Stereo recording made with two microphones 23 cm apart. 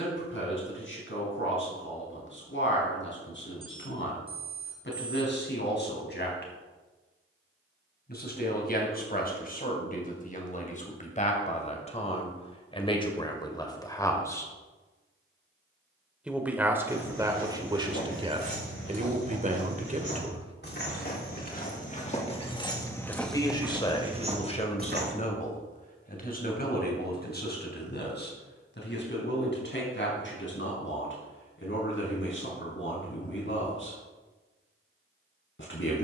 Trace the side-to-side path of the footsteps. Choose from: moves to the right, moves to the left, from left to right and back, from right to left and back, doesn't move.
moves to the right.